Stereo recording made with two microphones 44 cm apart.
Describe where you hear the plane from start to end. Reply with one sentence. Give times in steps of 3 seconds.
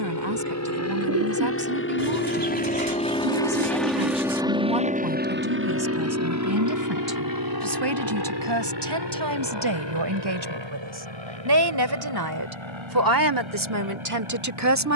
You can hear the plane on the left from 0 s, in the centre from 3 s and on the right from 6 s.